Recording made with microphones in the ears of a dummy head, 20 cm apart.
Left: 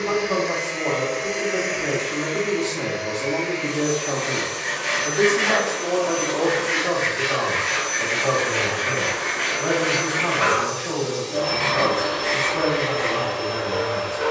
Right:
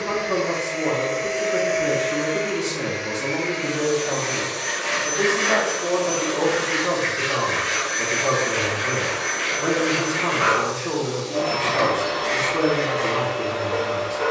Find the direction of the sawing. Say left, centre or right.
centre.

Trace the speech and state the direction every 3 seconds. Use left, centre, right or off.
right, centre, right, right, right.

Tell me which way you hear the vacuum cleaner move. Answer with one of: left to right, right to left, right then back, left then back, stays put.
right then back.